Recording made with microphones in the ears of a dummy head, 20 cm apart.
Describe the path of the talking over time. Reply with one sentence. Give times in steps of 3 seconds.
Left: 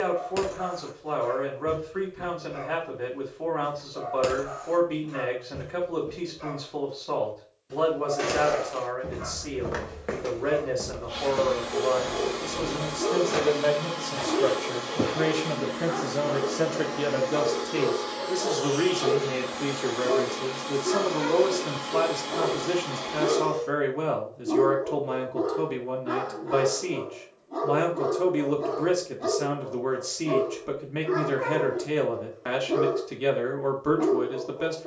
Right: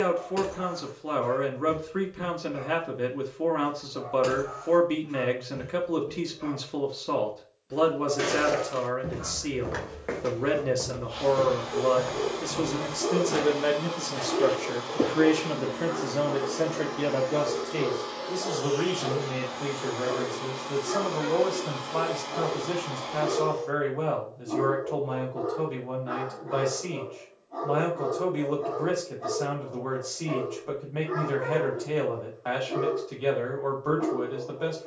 You can hear the talking on the right from 0 s, in the centre from 15 s and on the left from 18 s.